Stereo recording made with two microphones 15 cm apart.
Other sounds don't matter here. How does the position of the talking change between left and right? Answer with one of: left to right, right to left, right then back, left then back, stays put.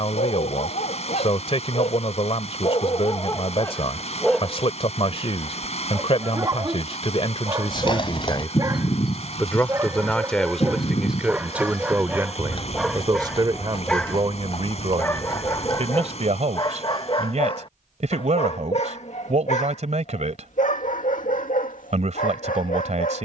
left to right.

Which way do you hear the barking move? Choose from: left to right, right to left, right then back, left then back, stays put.
right then back.